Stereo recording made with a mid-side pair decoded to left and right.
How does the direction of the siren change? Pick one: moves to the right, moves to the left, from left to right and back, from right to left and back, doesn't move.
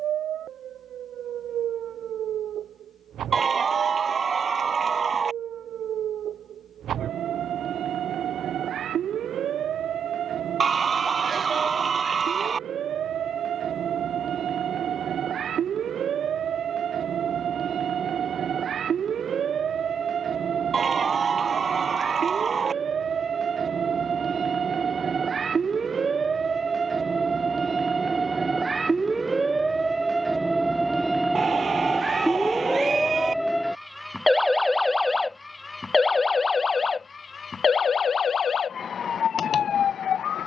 moves to the left.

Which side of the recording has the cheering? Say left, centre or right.
right.